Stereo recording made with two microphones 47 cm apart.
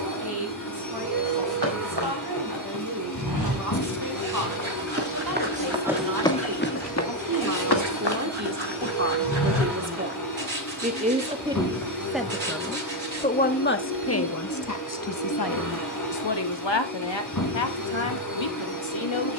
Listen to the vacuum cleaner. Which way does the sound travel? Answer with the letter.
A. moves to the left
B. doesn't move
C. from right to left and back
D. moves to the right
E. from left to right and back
B.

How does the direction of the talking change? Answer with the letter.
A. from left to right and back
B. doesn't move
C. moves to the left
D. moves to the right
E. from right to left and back
C.